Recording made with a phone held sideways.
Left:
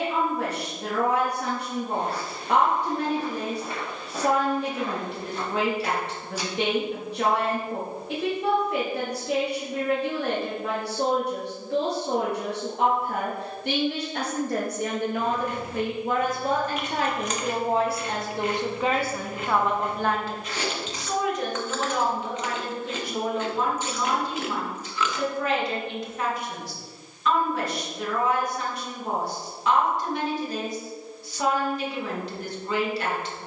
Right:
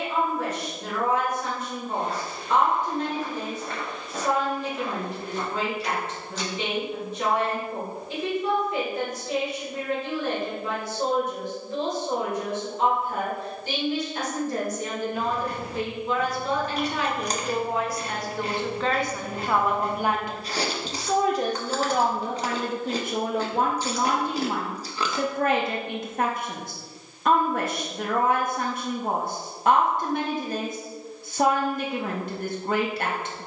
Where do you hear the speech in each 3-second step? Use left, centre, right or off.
left, left, left, left, left, left, centre, right, right, right, right.